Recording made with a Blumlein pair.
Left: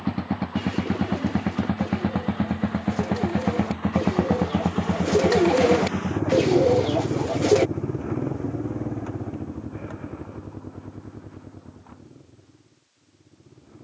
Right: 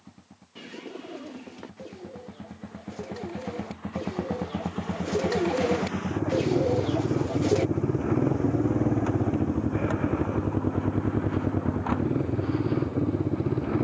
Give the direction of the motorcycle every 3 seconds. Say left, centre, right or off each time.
left, left, centre, right, right.